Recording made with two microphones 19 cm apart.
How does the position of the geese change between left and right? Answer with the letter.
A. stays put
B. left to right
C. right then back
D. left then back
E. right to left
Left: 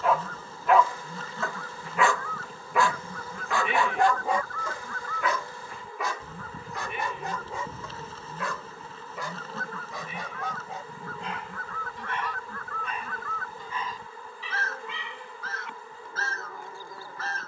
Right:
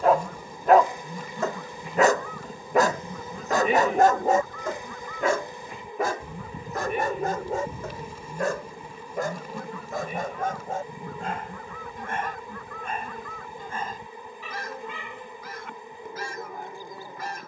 A.